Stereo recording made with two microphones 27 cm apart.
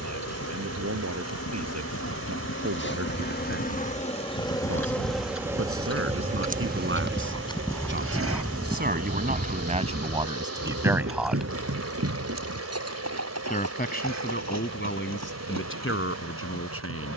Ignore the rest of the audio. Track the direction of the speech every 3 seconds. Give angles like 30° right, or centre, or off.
70° right, 60° right, 50° right, 20° right, 40° left, 50° left.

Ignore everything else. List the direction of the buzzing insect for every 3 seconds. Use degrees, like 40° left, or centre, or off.
50° left, 10° left, 40° right, 70° right, 70° right, 70° right.